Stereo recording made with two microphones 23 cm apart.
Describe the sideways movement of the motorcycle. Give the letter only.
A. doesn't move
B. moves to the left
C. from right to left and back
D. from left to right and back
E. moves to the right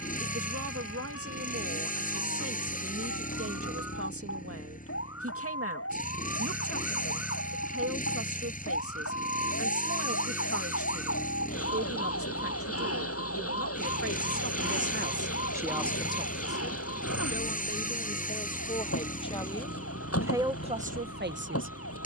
A.